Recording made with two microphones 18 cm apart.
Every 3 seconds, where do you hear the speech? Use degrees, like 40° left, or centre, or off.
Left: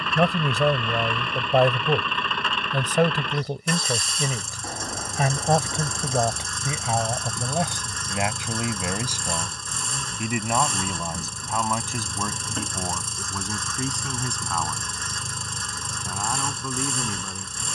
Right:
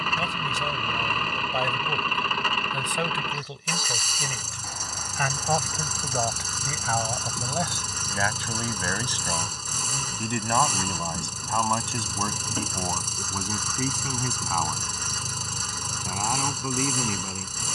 60° left, 40° left, 20° left, 10° left, centre, 10° right.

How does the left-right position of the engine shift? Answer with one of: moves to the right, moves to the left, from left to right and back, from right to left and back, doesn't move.
doesn't move.